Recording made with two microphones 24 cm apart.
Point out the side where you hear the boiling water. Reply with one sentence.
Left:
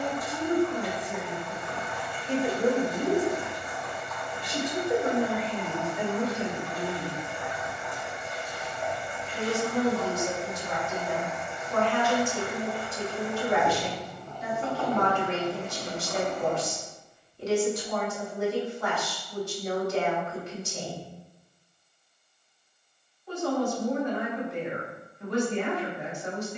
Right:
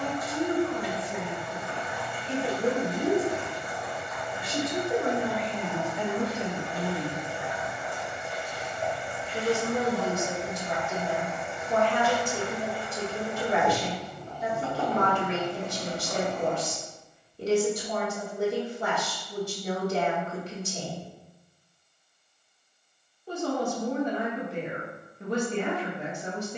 In this clip you hear the boiling water on the right.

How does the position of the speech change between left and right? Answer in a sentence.
You can hear the speech move from left to right.